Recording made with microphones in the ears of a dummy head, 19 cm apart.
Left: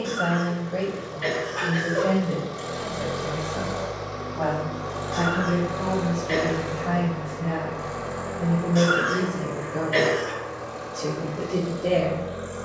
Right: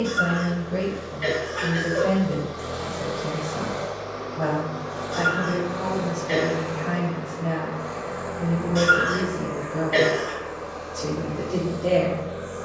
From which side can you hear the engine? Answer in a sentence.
In this clip you hear the engine on the left.